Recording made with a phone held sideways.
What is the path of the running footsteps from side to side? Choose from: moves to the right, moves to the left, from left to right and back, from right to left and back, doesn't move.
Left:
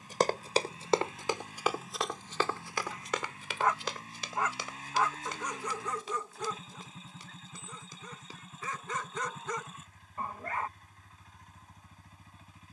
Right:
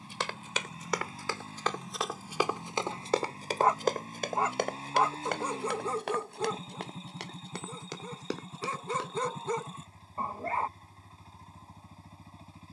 moves to the right.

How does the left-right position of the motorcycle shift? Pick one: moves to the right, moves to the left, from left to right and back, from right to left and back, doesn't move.
doesn't move.